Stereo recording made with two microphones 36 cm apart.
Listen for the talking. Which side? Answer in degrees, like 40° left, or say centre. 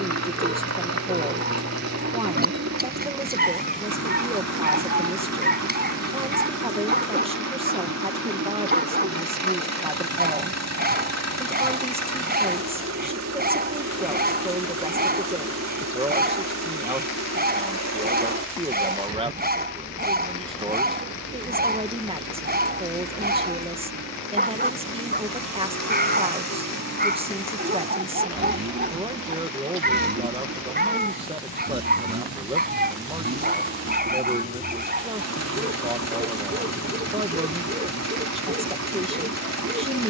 20° right.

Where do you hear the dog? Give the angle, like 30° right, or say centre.
20° right.